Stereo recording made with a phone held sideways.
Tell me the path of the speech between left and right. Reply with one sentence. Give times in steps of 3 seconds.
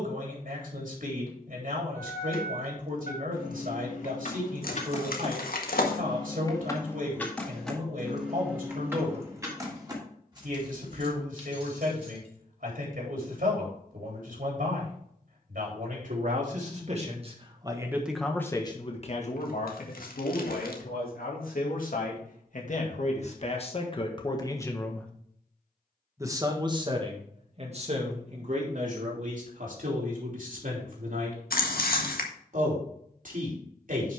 You can hear the speech on the right from 0 s, on the left from 18 s, in the centre from 24 s and on the right from 27 s.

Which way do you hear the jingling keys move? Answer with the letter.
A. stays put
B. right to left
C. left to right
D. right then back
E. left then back
C.